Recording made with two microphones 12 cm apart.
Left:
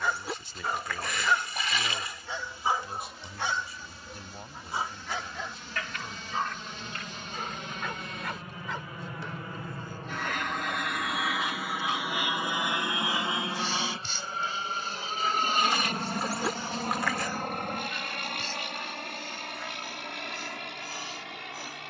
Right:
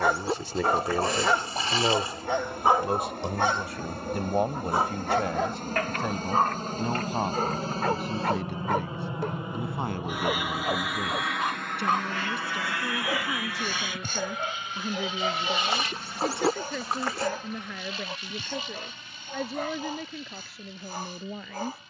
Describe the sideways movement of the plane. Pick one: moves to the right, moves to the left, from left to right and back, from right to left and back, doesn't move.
moves to the left.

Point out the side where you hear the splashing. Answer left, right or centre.
right.